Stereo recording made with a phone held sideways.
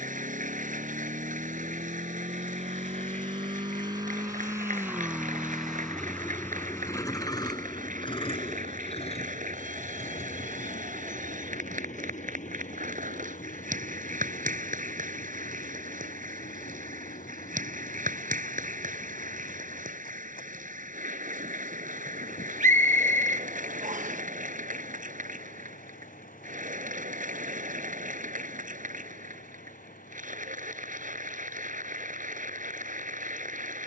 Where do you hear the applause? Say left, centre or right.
right.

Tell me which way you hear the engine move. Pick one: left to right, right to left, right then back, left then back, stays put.
right to left.